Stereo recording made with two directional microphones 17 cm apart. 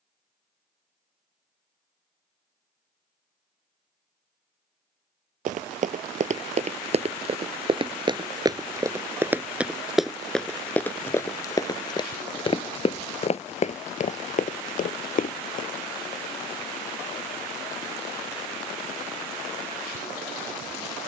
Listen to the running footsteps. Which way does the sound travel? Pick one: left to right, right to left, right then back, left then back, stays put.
right to left.